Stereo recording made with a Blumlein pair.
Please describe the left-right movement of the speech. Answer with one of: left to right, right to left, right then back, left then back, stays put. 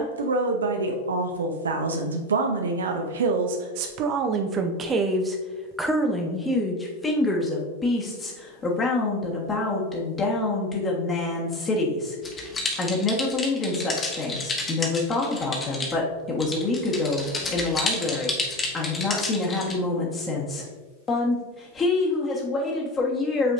right to left.